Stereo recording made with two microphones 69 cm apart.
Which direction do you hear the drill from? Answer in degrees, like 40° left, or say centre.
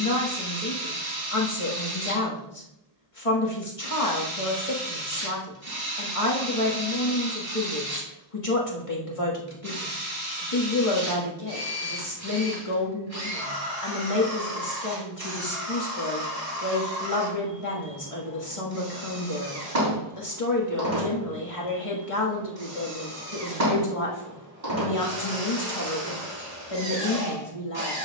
70° right.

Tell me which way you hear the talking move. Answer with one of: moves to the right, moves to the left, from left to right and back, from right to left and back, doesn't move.
doesn't move.